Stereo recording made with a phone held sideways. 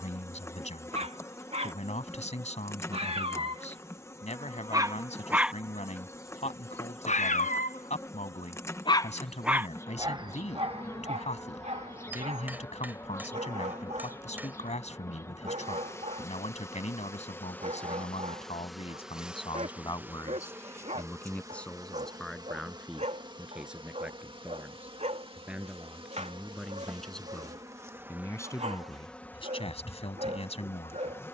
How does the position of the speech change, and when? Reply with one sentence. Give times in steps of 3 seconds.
In this clip you hear the speech on the left from 0 s, in the centre from 21 s and on the left from 27 s.